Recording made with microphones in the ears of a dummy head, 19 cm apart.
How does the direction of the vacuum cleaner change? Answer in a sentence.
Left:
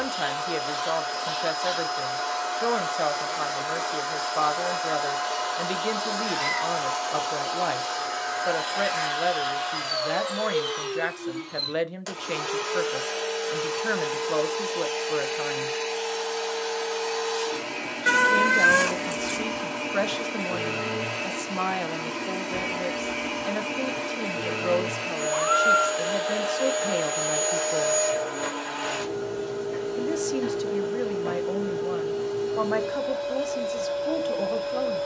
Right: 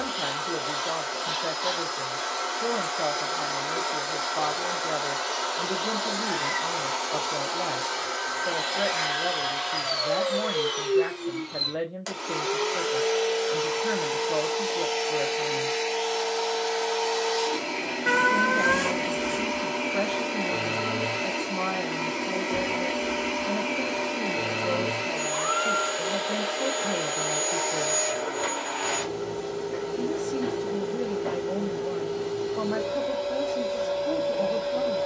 In this clip you hear the vacuum cleaner stay in one place.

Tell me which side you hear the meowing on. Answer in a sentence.
In this clip you hear the meowing on the left.